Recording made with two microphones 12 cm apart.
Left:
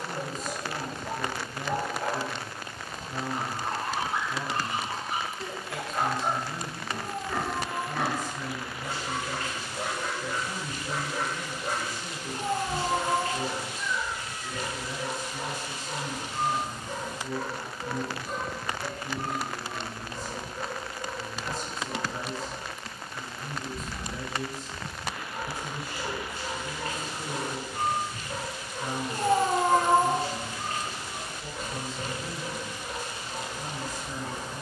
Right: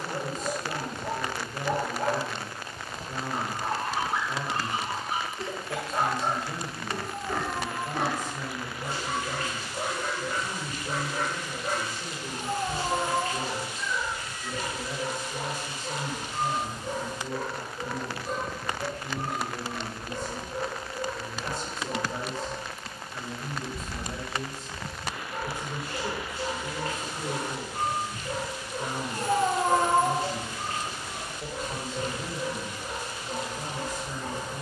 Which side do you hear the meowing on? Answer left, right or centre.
left.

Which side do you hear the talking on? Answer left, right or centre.
right.